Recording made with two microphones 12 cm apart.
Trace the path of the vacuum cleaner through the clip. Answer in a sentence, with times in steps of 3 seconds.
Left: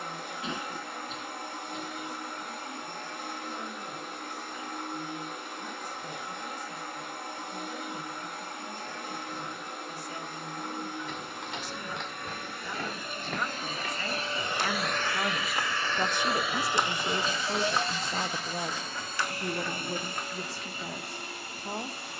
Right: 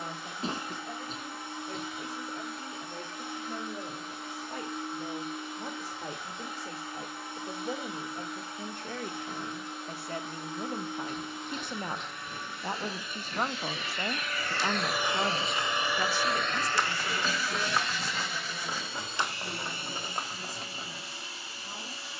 You can hear the vacuum cleaner on the left from 0 s, in the centre from 15 s and on the left from 18 s.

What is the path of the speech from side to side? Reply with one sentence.
You can hear the speech travel towards the left.